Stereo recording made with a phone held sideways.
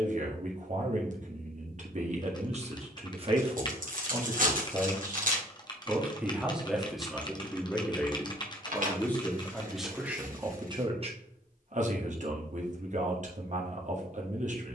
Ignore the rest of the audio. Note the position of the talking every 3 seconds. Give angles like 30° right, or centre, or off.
50° right, 30° right, centre, 20° right, 50° right.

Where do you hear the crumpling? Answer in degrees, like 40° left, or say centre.
60° right.